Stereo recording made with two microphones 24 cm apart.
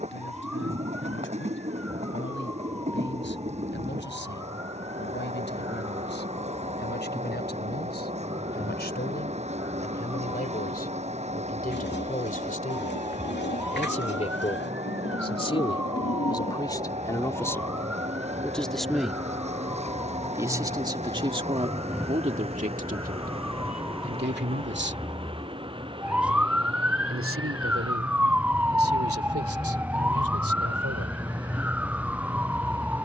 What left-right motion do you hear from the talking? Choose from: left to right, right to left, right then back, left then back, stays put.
left to right.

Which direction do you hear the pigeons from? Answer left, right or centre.
left.